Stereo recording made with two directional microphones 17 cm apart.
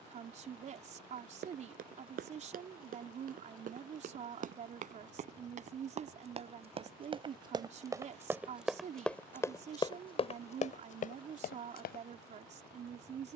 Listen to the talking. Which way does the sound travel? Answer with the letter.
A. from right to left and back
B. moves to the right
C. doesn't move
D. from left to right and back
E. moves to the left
C.